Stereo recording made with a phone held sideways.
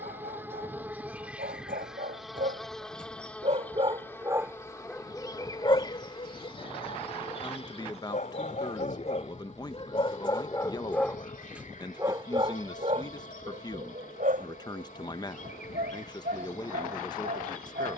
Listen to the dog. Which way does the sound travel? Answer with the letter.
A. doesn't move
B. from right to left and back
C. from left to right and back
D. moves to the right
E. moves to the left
B.